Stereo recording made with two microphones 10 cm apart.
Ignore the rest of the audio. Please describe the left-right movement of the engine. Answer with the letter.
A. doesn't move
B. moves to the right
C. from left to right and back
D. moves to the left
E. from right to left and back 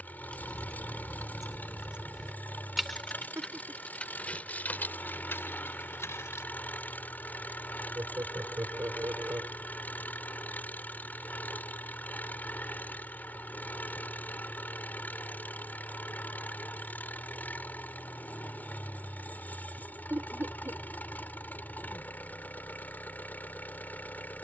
A.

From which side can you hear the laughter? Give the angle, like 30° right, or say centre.
30° right.